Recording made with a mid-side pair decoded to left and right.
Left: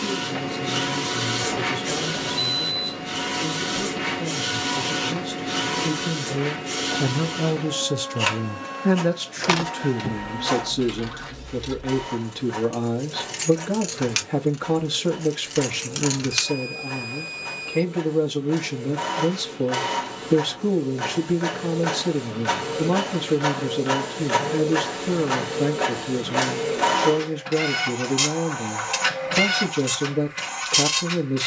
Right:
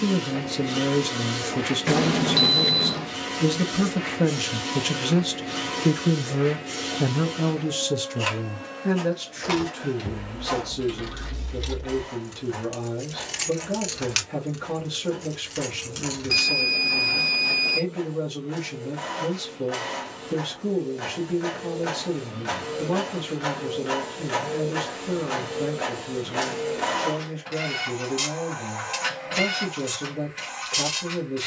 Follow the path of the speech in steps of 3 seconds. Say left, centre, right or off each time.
right, right, centre, left, left, left, left, left, left, left, left.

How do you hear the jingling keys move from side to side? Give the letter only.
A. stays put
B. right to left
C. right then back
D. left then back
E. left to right
C.